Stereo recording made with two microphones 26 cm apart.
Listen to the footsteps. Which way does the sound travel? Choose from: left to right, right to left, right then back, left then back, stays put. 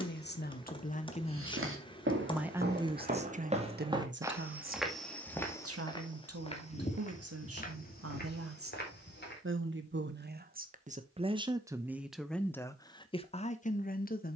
right to left.